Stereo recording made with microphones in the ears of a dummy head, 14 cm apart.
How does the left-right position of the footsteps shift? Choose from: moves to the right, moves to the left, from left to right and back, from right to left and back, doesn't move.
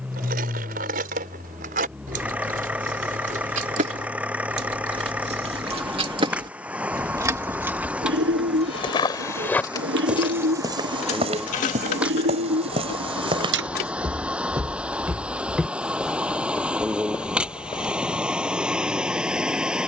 from left to right and back.